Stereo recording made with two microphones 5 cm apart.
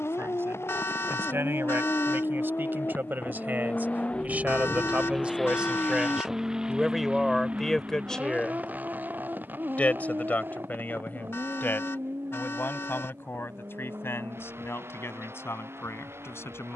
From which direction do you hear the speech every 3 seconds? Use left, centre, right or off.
right, right, centre, left, left, left.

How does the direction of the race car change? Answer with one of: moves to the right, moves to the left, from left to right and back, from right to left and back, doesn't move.
moves to the right.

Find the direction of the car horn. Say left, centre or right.
left.